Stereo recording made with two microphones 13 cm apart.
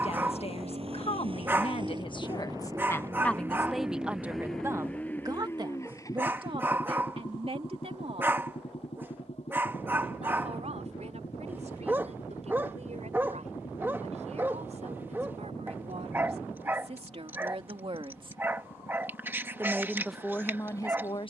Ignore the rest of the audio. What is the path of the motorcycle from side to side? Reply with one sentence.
You can hear the motorcycle move from right to left.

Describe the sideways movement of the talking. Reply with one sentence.
You can hear the talking move from left to right and back again.